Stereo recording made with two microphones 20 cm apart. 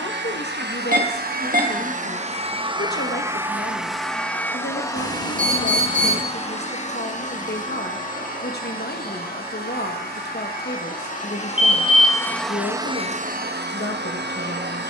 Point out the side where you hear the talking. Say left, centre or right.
left.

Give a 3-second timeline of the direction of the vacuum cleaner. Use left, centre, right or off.
right, centre, left, left, right.